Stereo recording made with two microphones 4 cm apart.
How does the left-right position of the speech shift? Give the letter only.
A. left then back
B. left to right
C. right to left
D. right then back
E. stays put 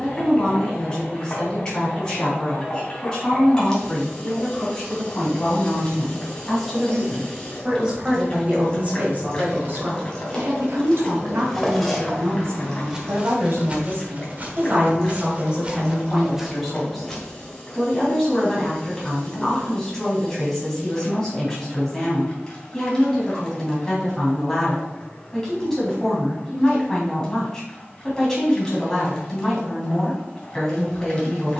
D.